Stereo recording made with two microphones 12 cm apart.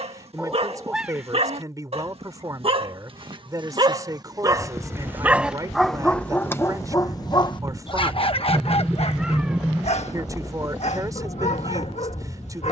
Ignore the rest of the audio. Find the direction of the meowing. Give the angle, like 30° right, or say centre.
10° right.